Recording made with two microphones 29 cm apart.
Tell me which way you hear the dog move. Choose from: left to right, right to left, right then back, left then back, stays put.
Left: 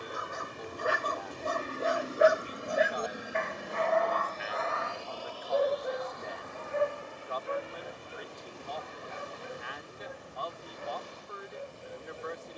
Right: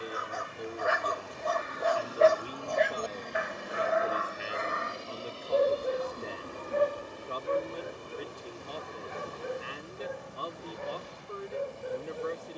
left to right.